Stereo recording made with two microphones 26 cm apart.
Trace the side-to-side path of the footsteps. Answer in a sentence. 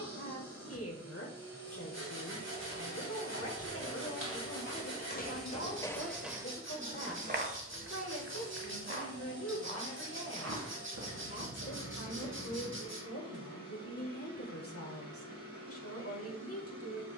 You can hear the footsteps move from left to right.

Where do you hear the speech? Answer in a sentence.
You can hear the speech on the left.